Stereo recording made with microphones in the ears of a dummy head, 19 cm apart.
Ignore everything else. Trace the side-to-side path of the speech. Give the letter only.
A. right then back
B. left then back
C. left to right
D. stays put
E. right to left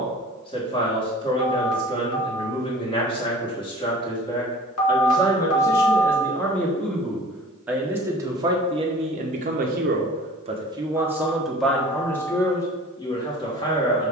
A.